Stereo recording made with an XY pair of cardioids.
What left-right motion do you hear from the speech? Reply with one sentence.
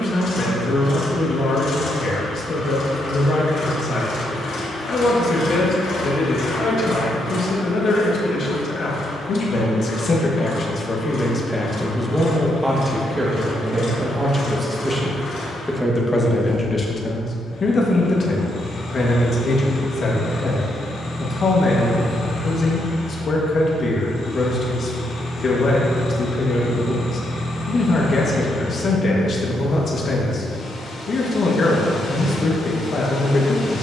You can hear the speech go right and come back.